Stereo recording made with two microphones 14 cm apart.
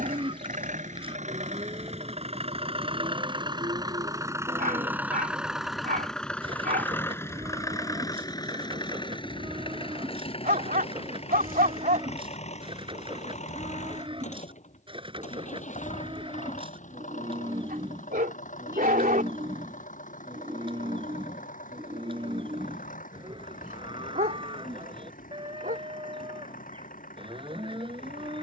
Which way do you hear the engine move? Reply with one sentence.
In this clip you hear the engine move from right to left.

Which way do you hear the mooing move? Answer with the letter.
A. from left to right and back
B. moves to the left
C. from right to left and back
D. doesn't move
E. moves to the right
D.